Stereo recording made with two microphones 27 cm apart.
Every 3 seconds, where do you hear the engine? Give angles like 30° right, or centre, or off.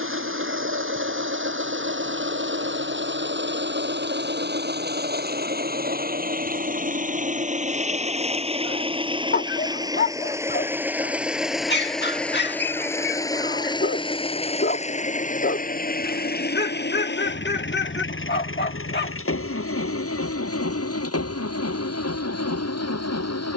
50° right, 40° right, 30° right, 10° right, 10° left, 40° left, 50° left, 60° left.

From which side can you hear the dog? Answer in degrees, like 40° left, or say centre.
40° left.